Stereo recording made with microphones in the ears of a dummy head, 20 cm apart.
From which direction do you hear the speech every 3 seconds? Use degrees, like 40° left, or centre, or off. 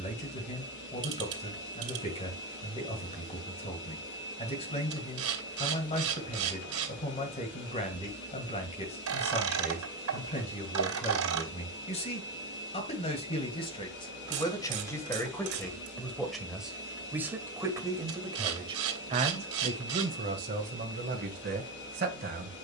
30° left, 30° left, 30° left, 30° left, 20° left, centre, 30° right, 50° right.